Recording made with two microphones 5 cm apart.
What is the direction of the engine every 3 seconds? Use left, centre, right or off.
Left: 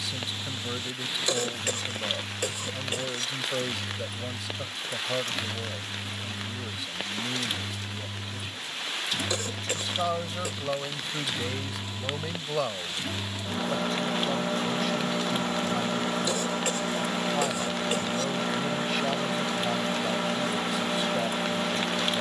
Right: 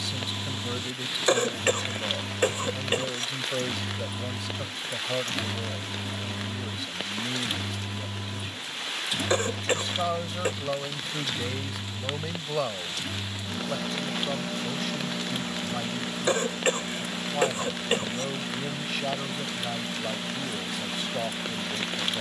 right, right, right, centre, left, left, left, left.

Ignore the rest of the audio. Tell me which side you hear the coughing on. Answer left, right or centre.
right.